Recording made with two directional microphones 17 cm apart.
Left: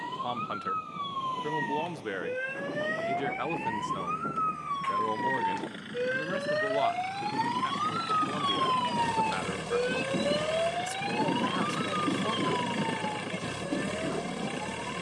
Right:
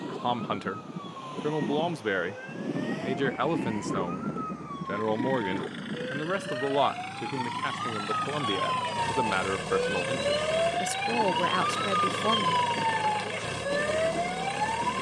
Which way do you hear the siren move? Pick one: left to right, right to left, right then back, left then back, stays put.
left to right.